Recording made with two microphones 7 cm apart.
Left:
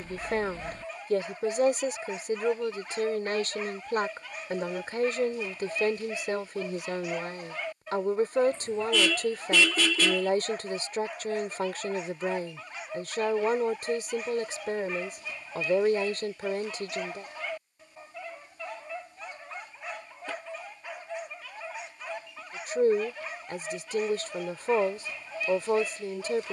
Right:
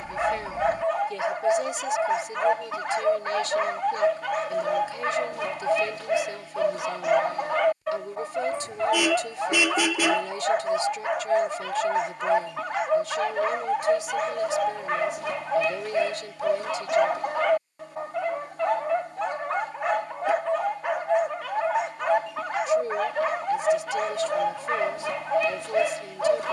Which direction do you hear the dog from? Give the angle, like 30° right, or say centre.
80° right.